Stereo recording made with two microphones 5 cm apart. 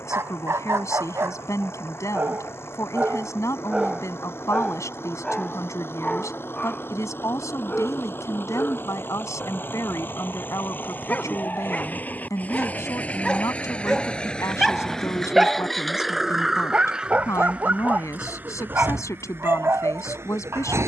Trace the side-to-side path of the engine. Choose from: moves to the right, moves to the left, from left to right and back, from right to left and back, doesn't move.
moves to the right.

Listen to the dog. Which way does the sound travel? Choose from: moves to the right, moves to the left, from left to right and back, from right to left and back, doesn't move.
from right to left and back.